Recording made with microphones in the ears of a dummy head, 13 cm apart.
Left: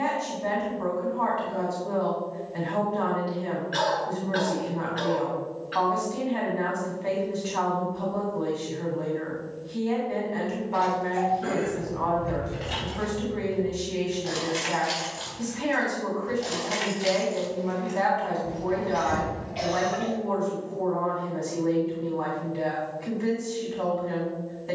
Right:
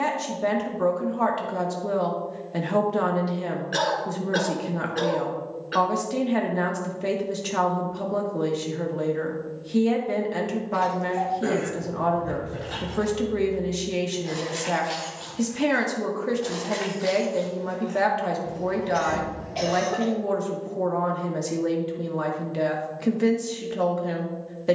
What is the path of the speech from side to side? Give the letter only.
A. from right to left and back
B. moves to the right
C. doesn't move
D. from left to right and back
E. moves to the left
C.